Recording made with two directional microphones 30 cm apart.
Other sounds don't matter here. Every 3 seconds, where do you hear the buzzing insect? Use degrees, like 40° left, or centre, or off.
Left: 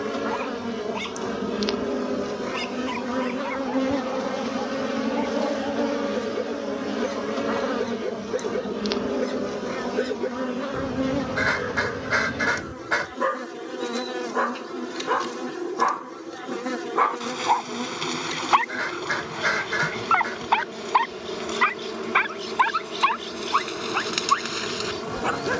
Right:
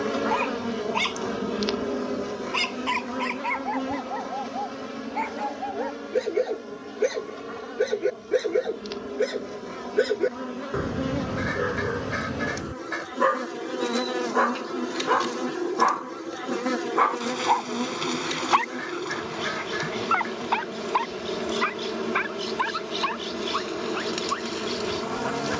10° left, 30° left, 50° left, 20° left, 10° right, 10° right, 10° right, 10° right, 10° right.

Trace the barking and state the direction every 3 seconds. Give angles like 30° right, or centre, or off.
50° right, 40° right, 40° right, 30° right, 20° right, centre, 20° left, 40° left, 50° left.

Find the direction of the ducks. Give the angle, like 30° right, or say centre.
60° left.